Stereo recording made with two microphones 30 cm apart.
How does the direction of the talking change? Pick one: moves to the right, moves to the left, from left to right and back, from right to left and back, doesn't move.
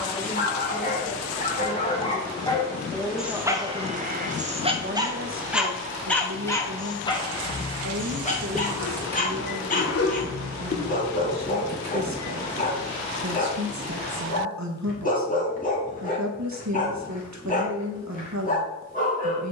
moves to the right.